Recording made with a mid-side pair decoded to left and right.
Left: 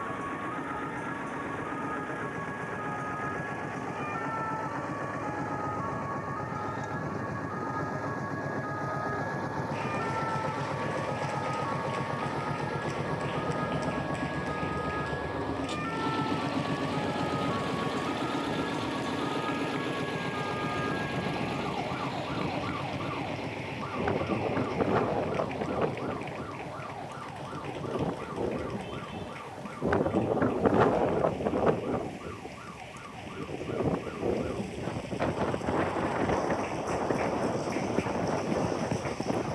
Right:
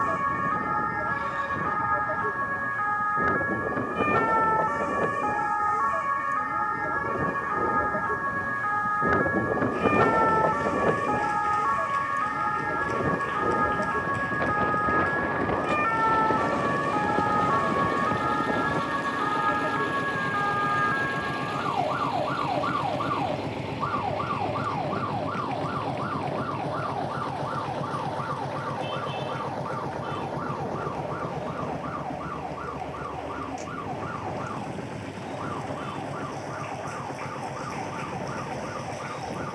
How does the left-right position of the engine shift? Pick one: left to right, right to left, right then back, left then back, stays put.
left to right.